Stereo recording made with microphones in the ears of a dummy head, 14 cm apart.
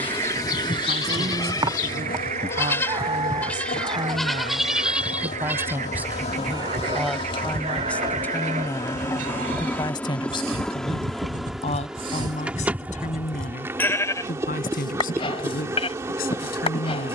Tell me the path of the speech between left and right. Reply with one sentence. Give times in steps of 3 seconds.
You can hear the speech on the right from 0 s, in the centre from 6 s and on the left from 9 s.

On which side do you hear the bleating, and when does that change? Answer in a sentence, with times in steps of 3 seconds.
In this clip you hear the bleating on the left from 0 s, in the centre from 3 s, on the right from 6 s, in the centre from 12 s and on the left from 15 s.